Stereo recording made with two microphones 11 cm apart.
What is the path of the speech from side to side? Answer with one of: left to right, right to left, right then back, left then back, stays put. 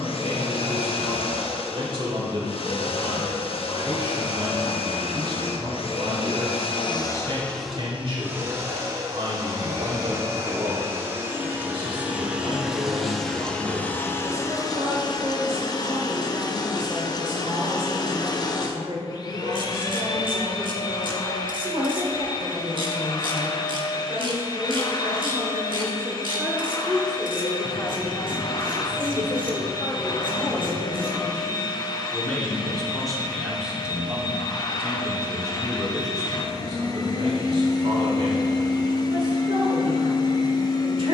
left then back.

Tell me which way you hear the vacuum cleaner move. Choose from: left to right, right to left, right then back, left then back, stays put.
right then back.